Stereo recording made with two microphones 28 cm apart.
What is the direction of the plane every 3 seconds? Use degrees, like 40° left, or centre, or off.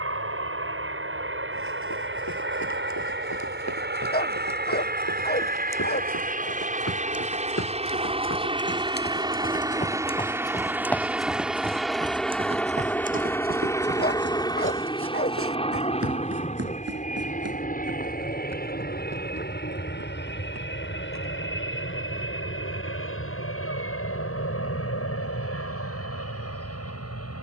50° right, 40° right, 20° right, 10° right, 10° left, 20° left, 30° left, 40° left, 50° left.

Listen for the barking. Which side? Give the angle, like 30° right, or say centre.
30° left.